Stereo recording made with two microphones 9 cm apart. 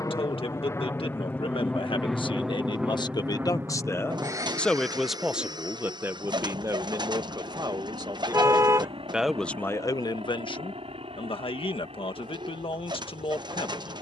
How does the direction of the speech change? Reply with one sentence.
In this clip you hear the speech move from left to right and back again.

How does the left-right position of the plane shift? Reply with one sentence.
In this clip you hear the plane move from left to right.